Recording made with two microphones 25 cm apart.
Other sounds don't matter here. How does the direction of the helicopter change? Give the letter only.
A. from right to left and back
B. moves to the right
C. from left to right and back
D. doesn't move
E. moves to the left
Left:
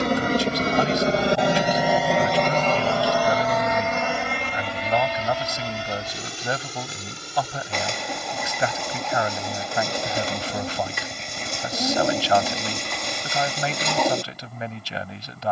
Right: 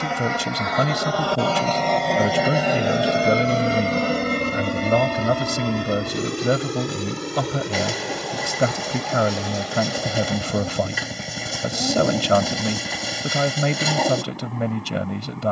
B.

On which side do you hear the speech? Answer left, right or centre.
right.